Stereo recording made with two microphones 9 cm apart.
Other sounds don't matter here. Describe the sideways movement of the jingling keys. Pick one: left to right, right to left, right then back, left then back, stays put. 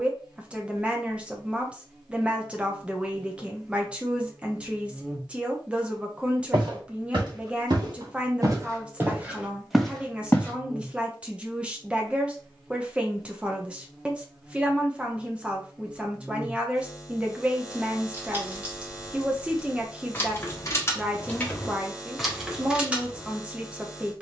left then back.